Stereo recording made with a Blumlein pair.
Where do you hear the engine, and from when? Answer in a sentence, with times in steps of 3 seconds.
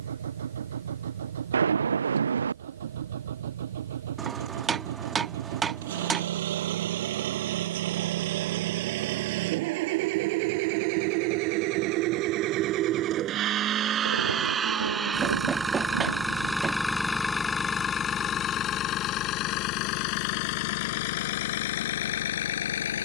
You can hear the engine on the right from 0 s, in the centre from 15 s and on the left from 18 s.